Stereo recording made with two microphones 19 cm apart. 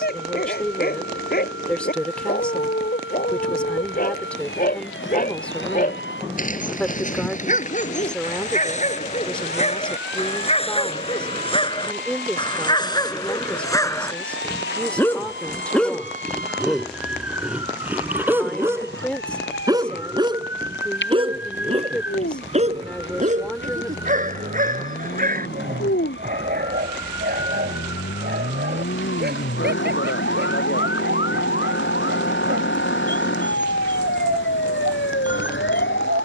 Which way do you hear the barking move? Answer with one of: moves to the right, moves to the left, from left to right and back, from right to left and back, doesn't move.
moves to the right.